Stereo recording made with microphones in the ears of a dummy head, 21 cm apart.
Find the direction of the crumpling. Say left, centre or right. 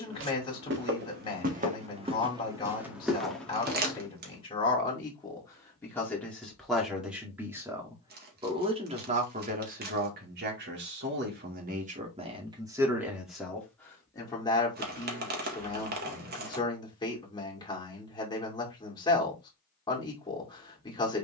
right.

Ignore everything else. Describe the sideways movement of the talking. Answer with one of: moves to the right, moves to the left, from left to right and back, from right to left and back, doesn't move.
from left to right and back.